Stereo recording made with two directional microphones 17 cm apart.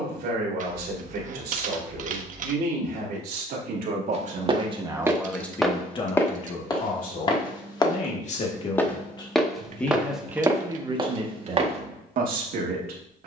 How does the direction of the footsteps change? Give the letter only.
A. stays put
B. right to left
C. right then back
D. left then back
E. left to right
D.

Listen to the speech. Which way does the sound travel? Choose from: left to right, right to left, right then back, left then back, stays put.
left then back.